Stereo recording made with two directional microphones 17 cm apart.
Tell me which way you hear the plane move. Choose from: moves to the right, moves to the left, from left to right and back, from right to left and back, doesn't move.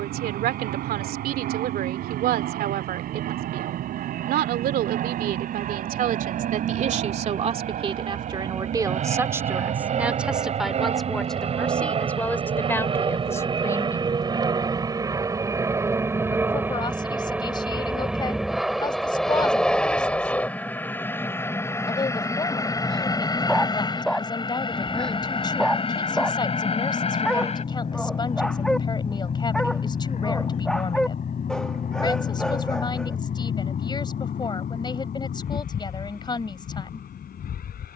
moves to the left.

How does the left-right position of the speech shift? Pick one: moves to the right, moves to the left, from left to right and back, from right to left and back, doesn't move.
moves to the left.